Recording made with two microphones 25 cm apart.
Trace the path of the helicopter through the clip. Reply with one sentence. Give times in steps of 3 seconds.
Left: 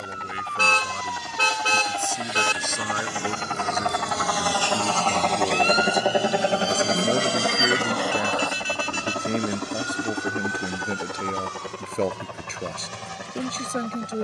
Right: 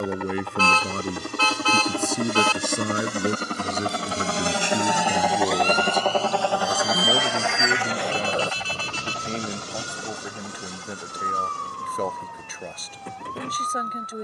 You can hear the helicopter on the right from 0 s and on the left from 6 s.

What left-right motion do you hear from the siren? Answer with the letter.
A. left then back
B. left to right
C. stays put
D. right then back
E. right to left
B.